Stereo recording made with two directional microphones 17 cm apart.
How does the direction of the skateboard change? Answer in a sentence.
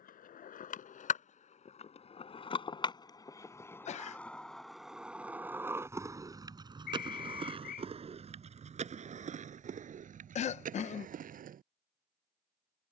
In this clip you hear the skateboard go from the left side to the right.